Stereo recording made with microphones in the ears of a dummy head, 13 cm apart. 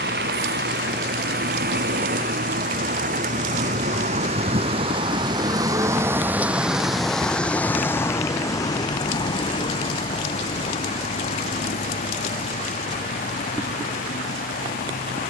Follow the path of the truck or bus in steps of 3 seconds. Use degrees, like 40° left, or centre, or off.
70° right, 40° right, 10° left, 40° left, 50° left.